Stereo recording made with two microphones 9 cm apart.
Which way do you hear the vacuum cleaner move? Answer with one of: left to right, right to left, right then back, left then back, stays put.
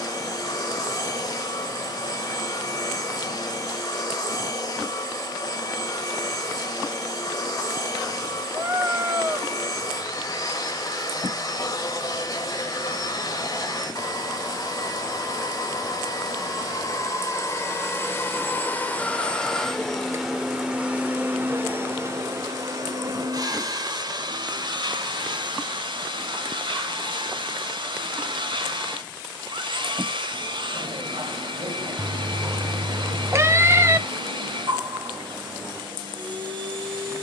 left to right.